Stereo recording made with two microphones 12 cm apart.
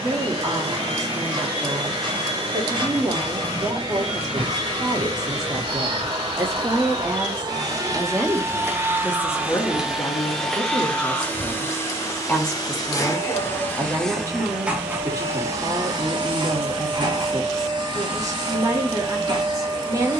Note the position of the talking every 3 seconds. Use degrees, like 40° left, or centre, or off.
30° right, 30° right, 10° right, 30° left, 10° right, 30° right, 30° right.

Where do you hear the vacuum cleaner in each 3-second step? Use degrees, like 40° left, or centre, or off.
40° right, 40° right, 30° right, centre, 10° left, 40° right, 40° right.